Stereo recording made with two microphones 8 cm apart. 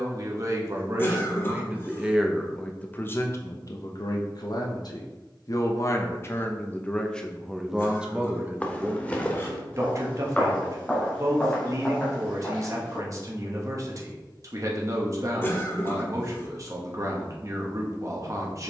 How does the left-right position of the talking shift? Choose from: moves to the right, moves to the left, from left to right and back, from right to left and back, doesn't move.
from right to left and back.